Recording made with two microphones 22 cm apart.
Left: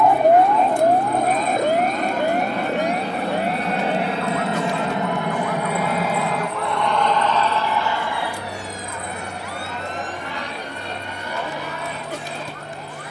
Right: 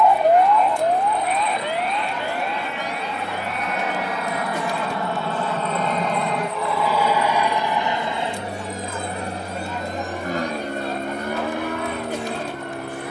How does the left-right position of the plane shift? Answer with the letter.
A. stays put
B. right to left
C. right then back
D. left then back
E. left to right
E.